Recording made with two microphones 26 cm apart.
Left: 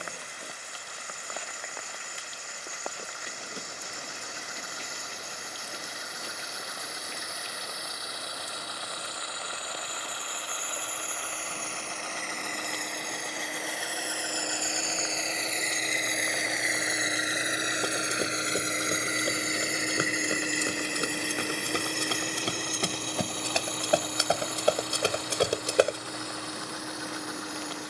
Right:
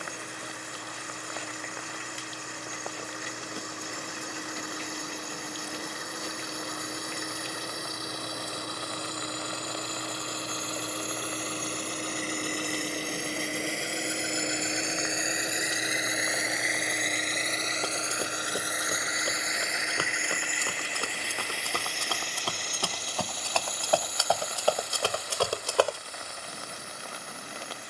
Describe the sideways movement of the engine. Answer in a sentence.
In this clip you hear the engine move to the left.